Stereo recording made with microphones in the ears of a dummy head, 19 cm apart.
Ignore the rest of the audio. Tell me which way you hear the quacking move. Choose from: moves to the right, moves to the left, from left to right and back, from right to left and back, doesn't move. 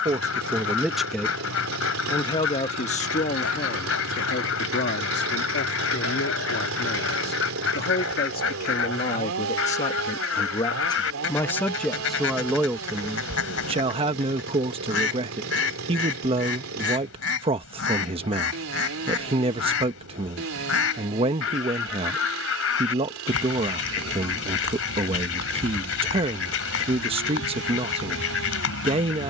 doesn't move.